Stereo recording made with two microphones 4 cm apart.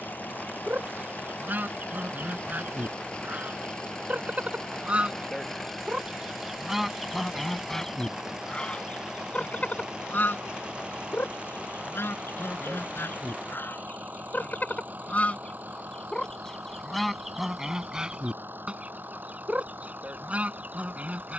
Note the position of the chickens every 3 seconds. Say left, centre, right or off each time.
right, right, centre, left, left, centre, right.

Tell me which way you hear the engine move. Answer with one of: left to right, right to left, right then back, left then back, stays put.
left to right.